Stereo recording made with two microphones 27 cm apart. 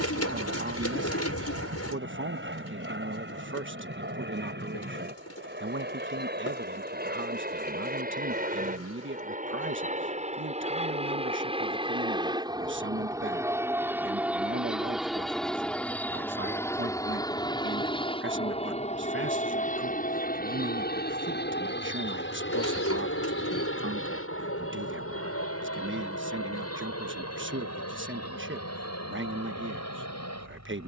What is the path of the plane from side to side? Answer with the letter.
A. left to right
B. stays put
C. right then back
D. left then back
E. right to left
E.